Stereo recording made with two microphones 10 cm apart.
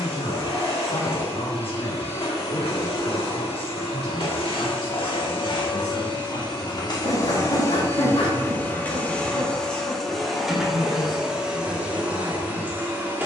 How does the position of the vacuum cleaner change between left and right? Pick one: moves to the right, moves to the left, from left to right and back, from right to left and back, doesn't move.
moves to the right.